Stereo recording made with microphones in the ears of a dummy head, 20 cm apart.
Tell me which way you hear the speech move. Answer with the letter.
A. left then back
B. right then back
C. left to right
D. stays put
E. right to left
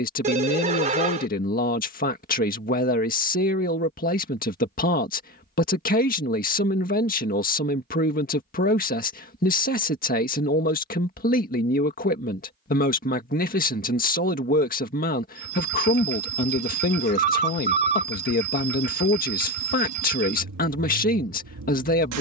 D.